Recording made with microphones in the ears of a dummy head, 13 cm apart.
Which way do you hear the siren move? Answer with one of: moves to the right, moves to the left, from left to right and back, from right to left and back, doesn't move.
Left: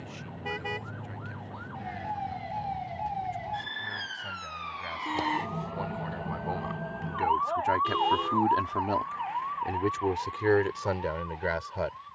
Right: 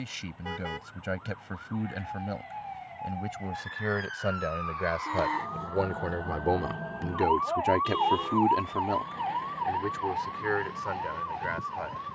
moves to the right.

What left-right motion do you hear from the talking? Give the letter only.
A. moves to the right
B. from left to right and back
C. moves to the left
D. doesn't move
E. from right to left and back
C.